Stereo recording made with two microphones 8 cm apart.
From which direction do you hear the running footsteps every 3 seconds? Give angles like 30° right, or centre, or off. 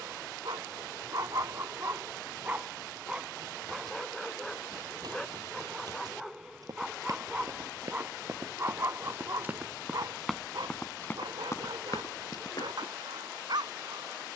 off, 60° right, 40° right, 10° left, 60° left.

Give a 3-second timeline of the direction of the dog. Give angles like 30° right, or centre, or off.
40° right, centre, 20° right, 60° right, 60° right.